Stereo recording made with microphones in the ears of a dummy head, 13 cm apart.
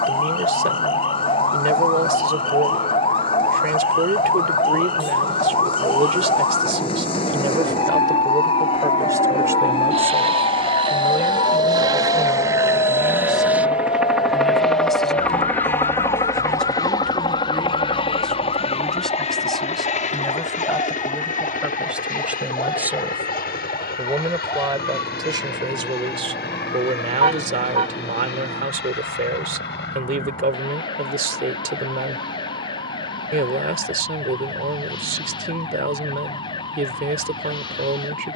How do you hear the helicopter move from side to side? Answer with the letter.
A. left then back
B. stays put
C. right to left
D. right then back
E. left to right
C.